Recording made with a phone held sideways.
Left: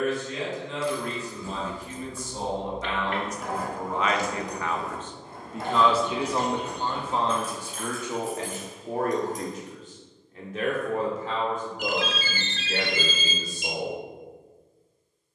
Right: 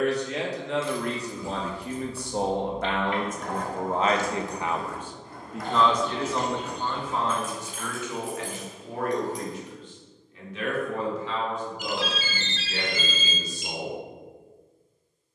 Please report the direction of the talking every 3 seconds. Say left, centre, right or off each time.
right, right, left, left, left.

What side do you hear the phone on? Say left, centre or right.
left.